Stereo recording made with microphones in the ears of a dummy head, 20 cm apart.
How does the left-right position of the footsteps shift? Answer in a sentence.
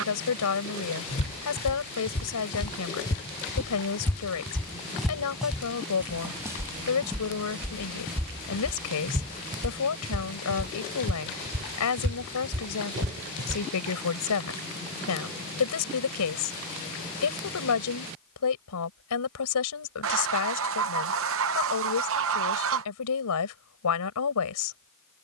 You can hear the footsteps go from the left side to the right.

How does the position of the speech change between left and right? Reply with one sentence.
You can hear the speech stay put.